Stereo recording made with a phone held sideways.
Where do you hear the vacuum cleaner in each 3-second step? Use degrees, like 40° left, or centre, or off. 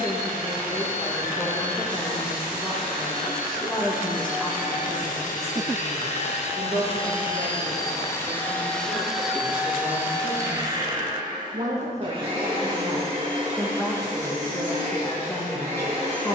80° left, 60° left, 30° left, 20° right, 40° right, 50° right.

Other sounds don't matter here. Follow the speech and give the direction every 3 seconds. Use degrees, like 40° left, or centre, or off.
20° left, centre, 50° right, 60° right, 10° right, 20° left.